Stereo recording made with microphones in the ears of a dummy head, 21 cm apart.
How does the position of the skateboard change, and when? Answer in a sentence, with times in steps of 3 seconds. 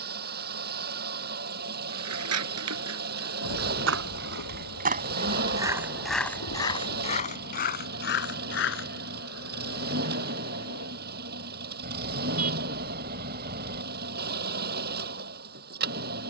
In this clip you hear the skateboard on the right from 0 s, on the left from 6 s and not at all from 12 s.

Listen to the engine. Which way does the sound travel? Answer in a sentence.
In this clip you hear the engine stay put.